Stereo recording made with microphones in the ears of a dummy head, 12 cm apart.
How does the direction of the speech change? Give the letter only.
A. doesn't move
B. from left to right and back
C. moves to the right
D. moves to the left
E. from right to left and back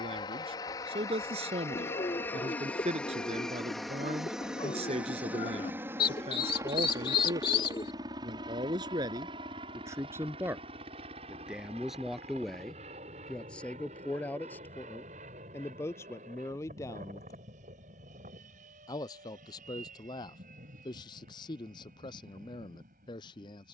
D.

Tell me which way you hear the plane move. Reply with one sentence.
In this clip you hear the plane go from the left side to the right.